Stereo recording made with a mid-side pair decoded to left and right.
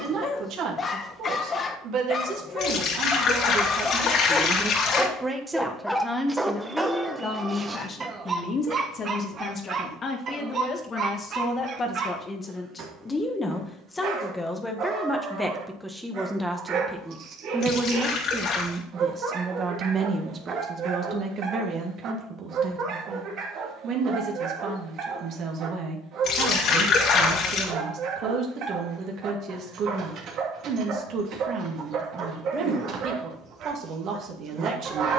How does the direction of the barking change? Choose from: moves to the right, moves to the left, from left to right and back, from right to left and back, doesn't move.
moves to the right.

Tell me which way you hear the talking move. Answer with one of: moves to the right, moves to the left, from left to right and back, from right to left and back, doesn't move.
from right to left and back.